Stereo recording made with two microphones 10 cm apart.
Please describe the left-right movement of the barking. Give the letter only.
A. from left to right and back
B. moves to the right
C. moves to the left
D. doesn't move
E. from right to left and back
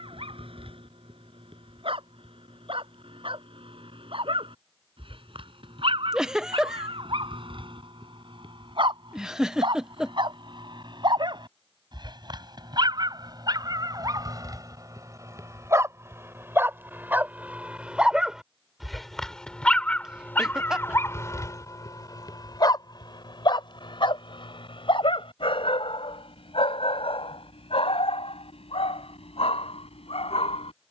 C.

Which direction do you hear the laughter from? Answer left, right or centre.
centre.